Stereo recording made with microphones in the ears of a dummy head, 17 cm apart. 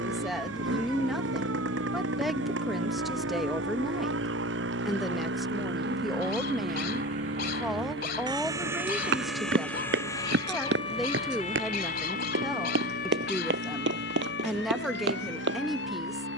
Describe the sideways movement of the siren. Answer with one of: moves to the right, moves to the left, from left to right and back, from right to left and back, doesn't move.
moves to the left.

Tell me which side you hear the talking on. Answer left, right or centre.
centre.